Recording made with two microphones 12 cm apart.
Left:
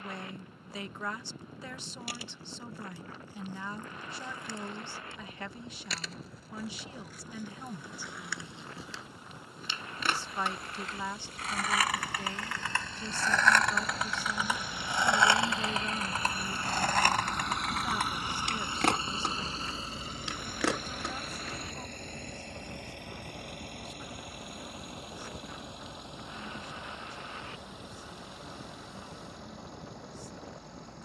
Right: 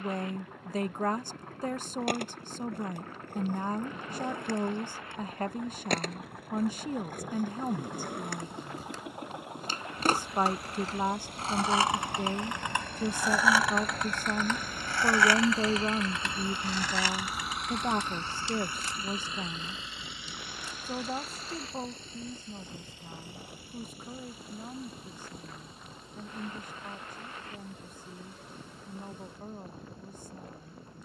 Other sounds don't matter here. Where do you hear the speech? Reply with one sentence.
You can hear the speech on the right.